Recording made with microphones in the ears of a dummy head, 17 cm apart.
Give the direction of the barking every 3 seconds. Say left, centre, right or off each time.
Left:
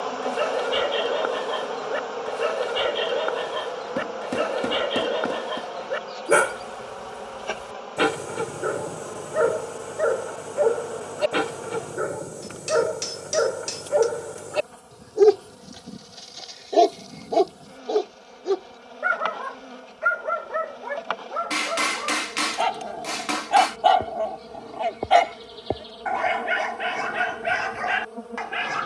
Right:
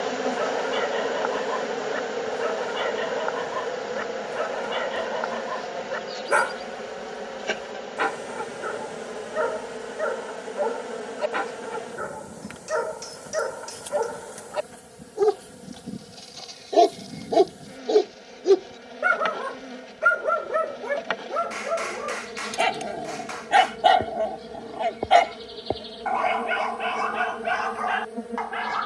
left, left, left, left, left, centre, right, right, centre, left.